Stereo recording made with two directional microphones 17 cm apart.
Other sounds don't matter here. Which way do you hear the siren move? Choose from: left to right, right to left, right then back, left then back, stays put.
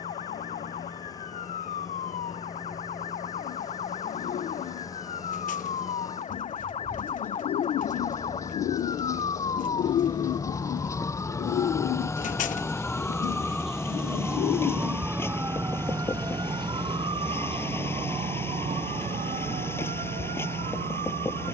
left to right.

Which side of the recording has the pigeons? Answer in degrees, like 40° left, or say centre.
50° left.